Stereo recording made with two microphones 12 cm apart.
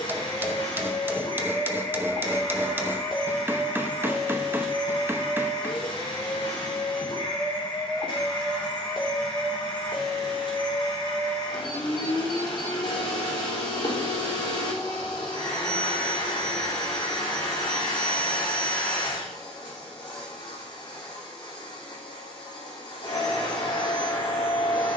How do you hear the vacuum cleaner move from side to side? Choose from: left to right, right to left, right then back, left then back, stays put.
stays put.